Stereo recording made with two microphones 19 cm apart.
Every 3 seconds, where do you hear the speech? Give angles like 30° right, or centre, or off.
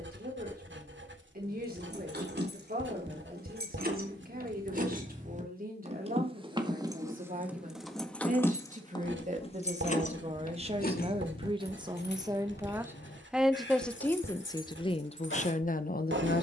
50° right, 50° right, 40° right, 30° right, centre, 40° left.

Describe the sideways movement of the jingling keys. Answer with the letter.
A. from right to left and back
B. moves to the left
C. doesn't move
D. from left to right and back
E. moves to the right
B.